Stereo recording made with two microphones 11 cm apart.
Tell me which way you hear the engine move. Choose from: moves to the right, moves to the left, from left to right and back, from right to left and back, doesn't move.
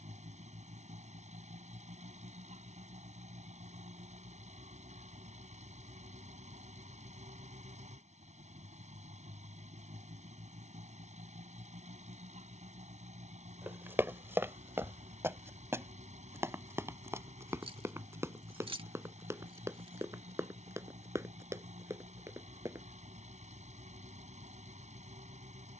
doesn't move.